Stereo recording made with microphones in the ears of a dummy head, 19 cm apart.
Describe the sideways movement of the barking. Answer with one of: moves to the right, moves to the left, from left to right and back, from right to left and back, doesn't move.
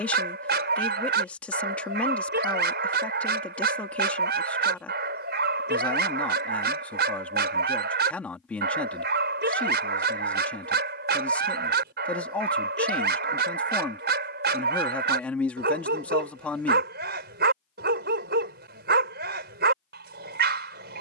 doesn't move.